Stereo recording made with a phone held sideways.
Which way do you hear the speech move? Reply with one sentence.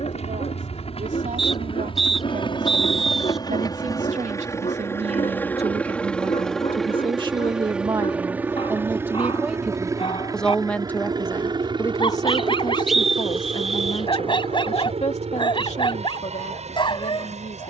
In this clip you hear the speech move to the left.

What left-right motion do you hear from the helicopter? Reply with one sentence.
In this clip you hear the helicopter move to the right.